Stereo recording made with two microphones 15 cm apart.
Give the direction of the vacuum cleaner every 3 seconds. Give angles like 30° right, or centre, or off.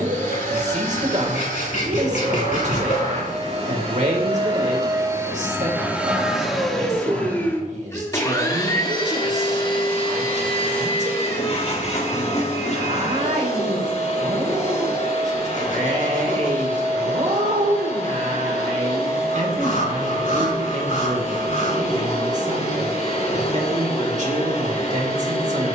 60° right, 30° right, 10° left, 40° left, 50° left, 50° left, 50° left, 50° left, 50° left.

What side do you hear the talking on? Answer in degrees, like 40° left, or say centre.
50° right.